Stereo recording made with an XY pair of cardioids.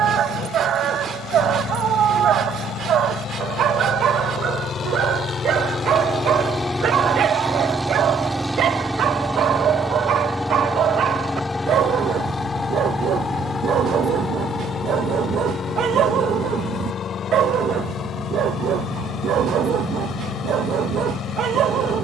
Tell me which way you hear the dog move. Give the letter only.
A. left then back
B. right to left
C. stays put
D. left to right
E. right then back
C.